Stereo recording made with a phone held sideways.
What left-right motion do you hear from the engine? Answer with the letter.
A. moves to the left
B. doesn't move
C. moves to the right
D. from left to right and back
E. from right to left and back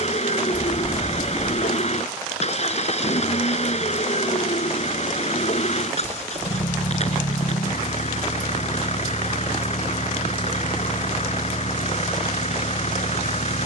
B.